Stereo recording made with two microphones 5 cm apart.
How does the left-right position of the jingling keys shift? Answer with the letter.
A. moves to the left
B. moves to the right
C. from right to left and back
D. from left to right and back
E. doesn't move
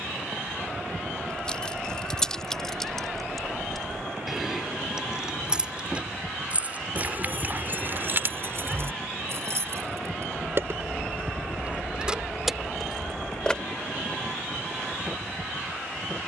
D.